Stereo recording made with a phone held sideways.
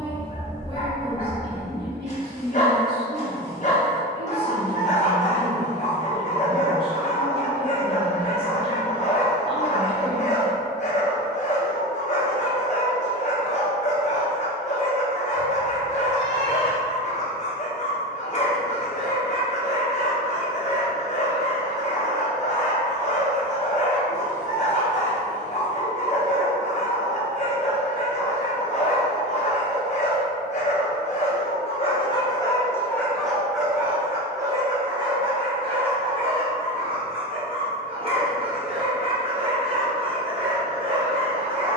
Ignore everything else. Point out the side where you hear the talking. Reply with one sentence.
In this clip you hear the talking on the right.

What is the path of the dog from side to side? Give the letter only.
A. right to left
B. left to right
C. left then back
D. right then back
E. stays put
B.